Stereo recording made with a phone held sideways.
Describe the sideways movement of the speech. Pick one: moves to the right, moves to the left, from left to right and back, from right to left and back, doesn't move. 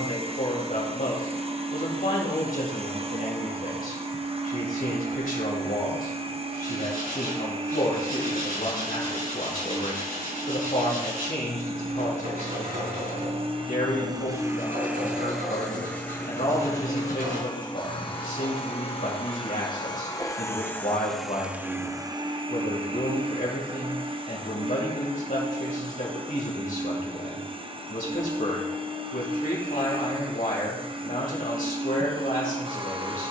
doesn't move.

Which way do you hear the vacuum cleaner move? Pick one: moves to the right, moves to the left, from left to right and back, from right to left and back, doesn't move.
from right to left and back.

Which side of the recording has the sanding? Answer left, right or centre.
right.